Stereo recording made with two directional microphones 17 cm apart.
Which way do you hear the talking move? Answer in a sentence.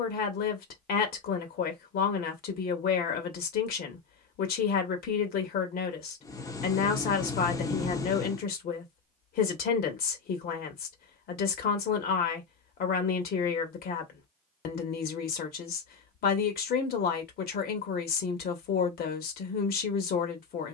You can hear the talking stay put.